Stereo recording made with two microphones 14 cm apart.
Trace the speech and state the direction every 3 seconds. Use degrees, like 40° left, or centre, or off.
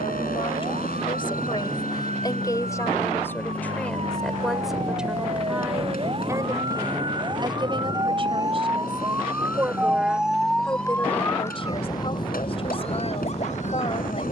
30° left, centre, 30° right, 10° left, 40° left.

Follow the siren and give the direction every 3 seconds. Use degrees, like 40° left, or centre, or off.
50° right, 50° right, 30° right, centre, 50° left.